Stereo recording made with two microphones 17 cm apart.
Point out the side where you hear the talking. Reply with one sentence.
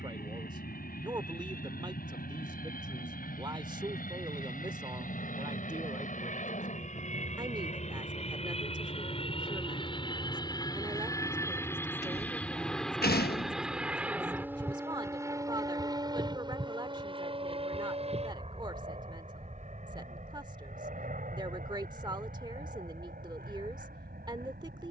In this clip you hear the talking on the right.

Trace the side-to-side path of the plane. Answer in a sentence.
You can hear the plane move from left to right.